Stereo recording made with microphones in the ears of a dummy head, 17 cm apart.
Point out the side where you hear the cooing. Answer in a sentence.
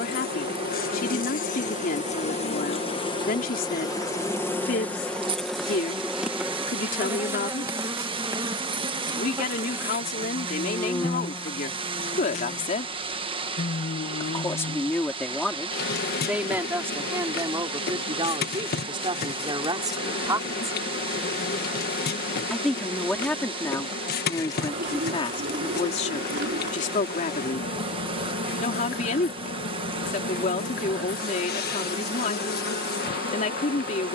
In this clip you hear the cooing on the right.